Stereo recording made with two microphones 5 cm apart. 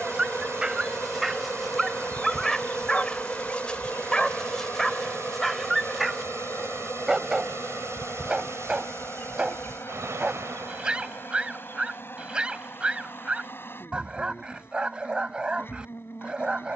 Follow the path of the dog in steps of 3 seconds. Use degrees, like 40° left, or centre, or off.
centre, 10° left, 10° right, 20° right, 20° right, 20° right.